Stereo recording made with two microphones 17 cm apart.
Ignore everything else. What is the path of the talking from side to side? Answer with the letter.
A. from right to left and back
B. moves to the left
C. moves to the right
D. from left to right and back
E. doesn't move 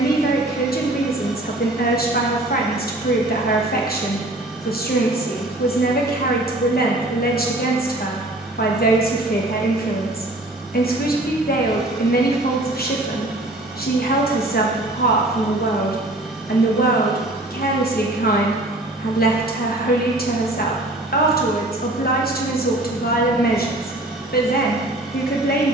E.